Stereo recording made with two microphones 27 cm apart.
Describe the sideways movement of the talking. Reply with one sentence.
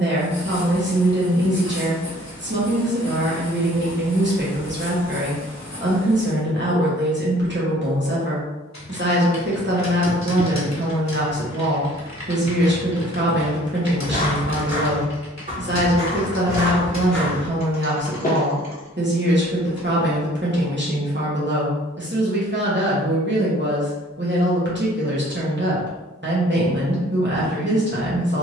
You can hear the talking stay in one place.